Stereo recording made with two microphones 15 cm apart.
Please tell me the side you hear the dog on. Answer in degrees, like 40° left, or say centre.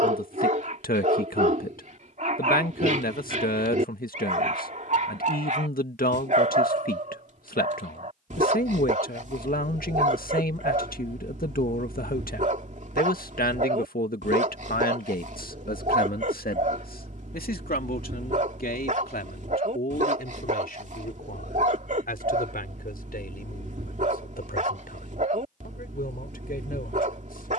60° right.